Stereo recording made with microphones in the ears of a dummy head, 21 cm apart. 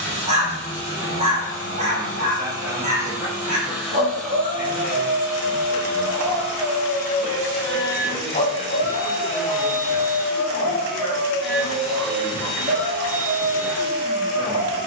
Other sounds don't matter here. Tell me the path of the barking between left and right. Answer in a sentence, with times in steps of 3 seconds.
You can hear the barking on the right from 0 s, in the centre from 6 s, on the left from 9 s and on the right from 12 s.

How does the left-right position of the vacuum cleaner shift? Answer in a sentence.
In this clip you hear the vacuum cleaner go left and come back.